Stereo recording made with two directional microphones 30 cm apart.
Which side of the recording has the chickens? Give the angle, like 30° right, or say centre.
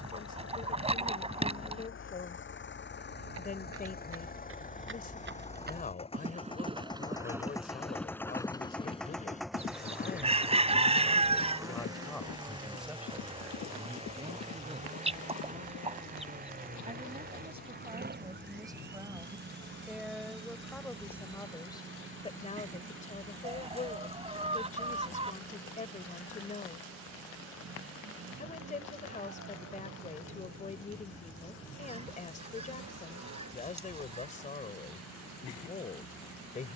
20° right.